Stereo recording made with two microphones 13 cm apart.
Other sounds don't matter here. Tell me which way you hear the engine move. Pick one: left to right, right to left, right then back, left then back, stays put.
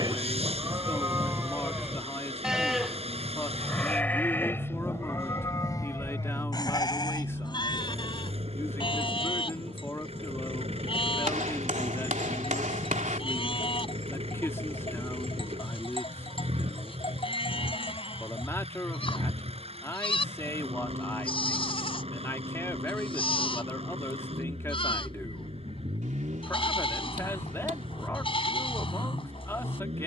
stays put.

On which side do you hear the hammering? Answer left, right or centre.
right.